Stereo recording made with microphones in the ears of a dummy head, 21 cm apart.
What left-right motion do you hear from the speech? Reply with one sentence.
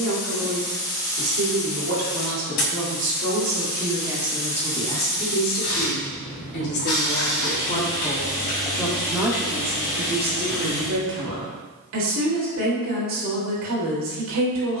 You can hear the speech move from right to left and back again.